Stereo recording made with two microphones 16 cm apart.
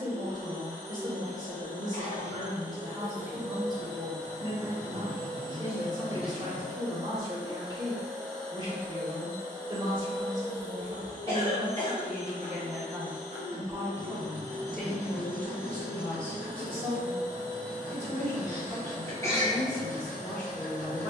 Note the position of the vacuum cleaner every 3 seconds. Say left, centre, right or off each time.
left, left, centre, left, left, left, left.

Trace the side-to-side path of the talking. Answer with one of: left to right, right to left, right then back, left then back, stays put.
right to left.